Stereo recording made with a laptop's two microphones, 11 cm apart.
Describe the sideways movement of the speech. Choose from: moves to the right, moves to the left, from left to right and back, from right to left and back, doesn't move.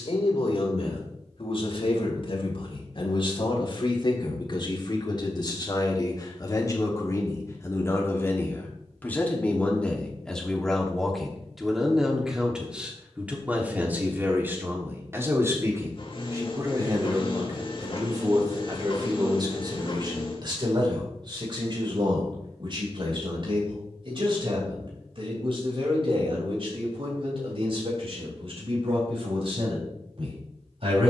moves to the right.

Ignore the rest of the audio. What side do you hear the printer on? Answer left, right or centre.
left.